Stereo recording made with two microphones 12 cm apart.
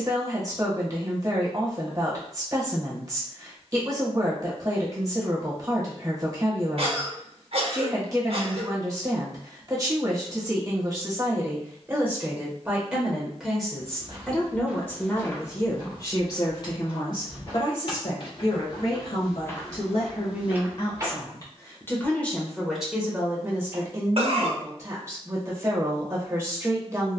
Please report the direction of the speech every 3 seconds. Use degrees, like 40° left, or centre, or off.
30° right, 30° right, 30° right, 30° right, centre, 40° left, 50° left, centre, 30° right.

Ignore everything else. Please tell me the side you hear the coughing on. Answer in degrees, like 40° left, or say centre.
60° right.